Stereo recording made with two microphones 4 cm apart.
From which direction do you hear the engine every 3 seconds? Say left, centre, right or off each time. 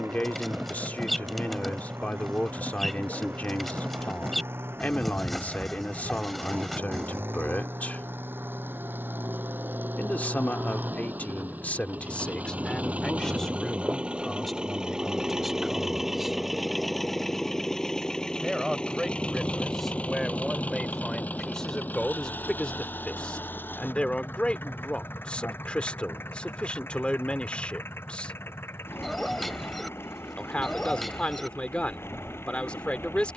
right, right, right, right, right, centre, left, left, left, left, left.